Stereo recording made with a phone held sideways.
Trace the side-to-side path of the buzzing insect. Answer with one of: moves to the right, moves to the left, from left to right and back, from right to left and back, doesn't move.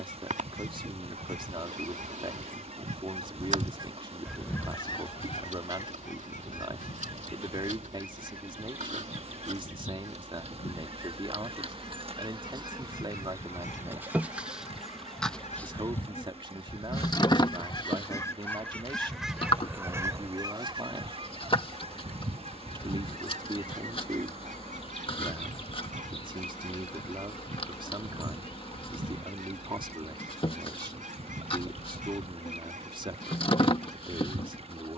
moves to the left.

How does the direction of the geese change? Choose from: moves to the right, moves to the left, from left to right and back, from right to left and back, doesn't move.
from right to left and back.